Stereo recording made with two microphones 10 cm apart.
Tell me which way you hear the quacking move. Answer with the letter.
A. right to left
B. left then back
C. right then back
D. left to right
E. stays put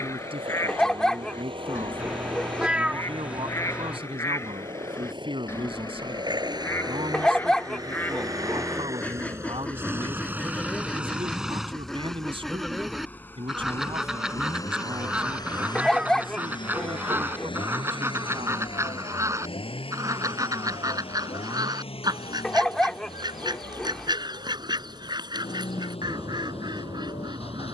D.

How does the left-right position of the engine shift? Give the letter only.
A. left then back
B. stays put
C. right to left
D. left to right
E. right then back
C.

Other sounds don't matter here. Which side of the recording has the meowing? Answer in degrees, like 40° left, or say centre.
10° right.